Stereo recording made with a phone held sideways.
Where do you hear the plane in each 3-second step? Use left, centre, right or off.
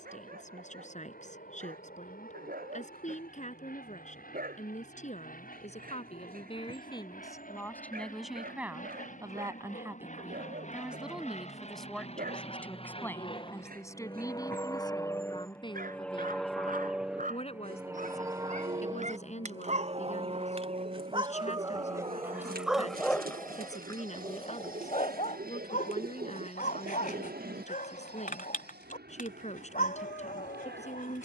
left, left, left, left, left, centre, right, right, right, right, right.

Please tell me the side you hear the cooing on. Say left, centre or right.
right.